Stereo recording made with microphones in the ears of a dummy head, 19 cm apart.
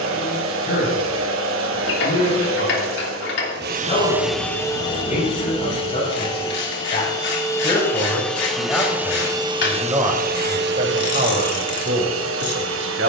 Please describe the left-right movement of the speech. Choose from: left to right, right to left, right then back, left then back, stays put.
left to right.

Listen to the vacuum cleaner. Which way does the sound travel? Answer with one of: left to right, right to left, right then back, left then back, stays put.
left then back.